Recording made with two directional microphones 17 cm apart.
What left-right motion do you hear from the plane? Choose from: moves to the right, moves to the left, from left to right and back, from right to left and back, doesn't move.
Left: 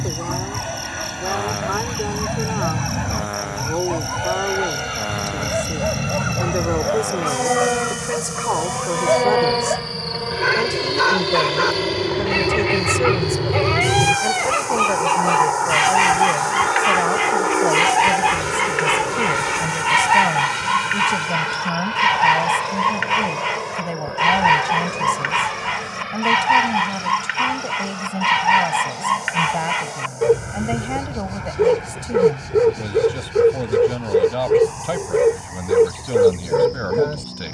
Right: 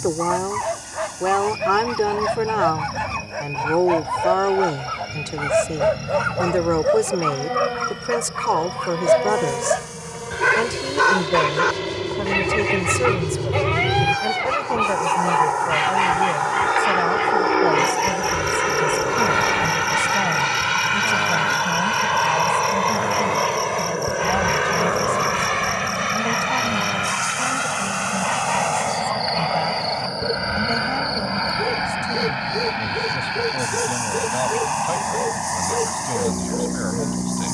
moves to the right.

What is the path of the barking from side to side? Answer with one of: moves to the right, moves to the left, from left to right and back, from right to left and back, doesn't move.
moves to the left.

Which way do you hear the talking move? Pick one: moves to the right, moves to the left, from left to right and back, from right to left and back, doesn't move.
moves to the left.